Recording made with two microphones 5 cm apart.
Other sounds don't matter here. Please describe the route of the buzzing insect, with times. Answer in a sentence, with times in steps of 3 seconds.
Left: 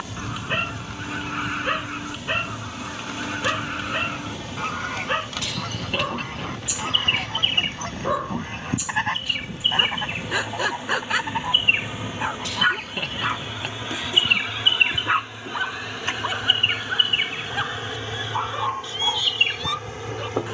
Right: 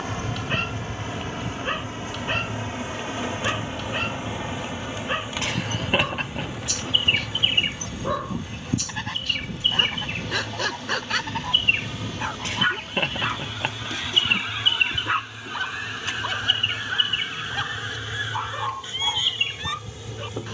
In this clip you hear the buzzing insect on the right from 0 s, in the centre from 6 s and on the left from 12 s.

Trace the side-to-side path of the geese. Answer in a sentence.
In this clip you hear the geese go from the left side to the right.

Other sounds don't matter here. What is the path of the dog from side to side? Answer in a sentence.
In this clip you hear the dog stay in one place.